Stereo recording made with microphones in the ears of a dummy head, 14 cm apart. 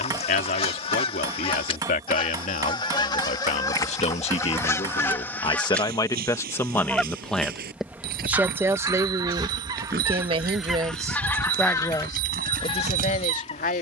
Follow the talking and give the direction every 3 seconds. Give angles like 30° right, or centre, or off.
60° left, 40° left, centre, 20° right, 50° left.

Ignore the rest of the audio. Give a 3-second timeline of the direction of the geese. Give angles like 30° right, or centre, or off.
30° left, 20° left, 10° right, 10° right, 40° left.